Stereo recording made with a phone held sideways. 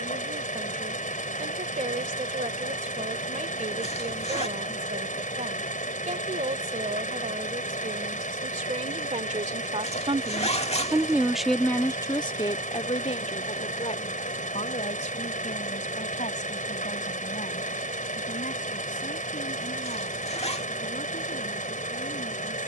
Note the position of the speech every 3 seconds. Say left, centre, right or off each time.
right, right, right, right, left, left, left, left.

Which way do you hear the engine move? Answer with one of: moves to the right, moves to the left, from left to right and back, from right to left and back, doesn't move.
doesn't move.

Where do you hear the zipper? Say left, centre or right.
left.